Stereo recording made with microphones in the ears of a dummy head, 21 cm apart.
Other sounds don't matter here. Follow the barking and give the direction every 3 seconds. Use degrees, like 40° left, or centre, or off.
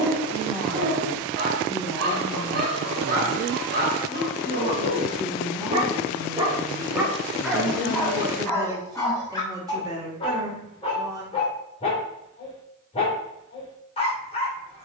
40° right, 40° right, centre, 20° left, 30° left.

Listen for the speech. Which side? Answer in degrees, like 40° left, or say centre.
20° right.